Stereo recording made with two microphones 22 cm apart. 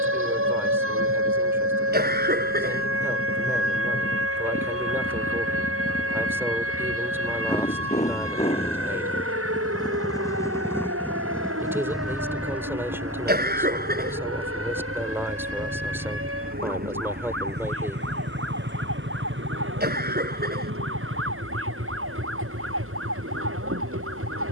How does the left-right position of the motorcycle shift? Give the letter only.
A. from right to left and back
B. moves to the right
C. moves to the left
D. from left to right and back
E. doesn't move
B.